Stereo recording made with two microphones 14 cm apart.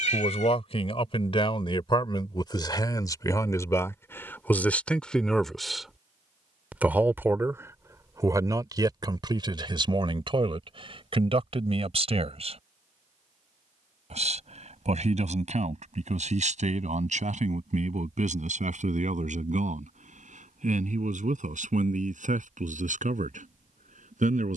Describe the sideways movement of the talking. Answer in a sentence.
You can hear the talking go from the left side to the right.